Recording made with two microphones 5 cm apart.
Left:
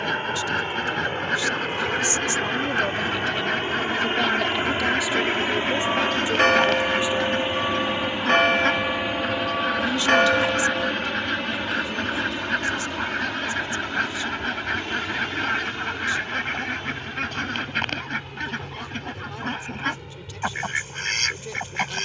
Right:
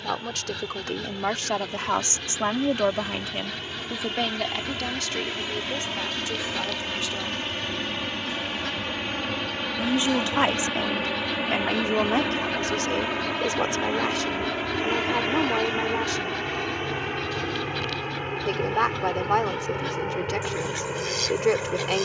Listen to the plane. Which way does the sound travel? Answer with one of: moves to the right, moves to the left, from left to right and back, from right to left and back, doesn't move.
moves to the right.